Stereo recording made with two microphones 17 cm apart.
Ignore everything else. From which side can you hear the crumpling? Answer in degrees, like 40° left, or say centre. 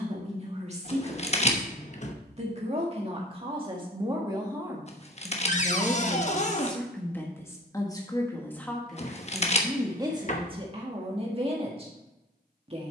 40° left.